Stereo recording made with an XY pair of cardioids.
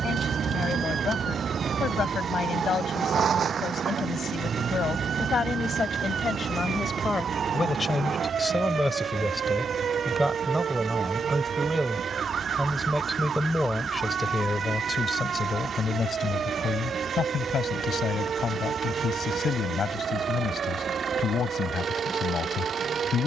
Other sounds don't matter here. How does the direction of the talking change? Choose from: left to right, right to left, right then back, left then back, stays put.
right then back.